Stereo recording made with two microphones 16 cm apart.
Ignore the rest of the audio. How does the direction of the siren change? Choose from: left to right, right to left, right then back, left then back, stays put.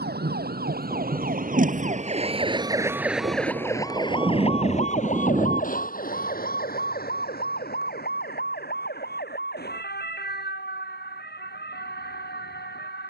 right to left.